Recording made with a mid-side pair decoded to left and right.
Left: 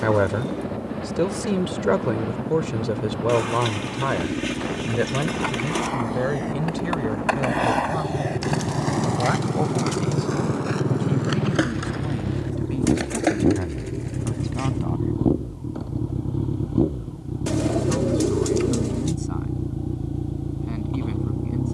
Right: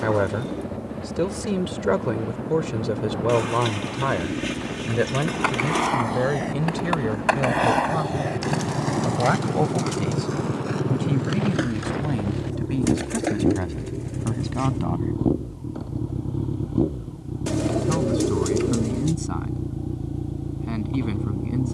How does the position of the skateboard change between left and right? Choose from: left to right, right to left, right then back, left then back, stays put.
right to left.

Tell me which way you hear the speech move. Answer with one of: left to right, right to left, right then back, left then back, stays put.
left to right.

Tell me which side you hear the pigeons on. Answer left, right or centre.
centre.